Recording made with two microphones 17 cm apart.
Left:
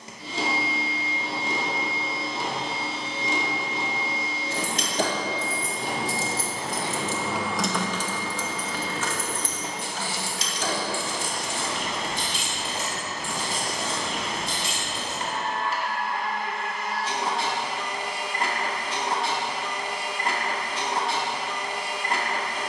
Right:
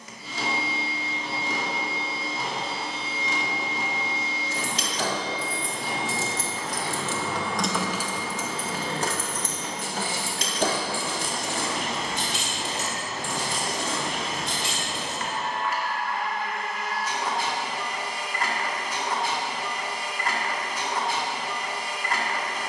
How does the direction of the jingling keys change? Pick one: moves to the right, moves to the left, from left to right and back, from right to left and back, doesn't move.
moves to the right.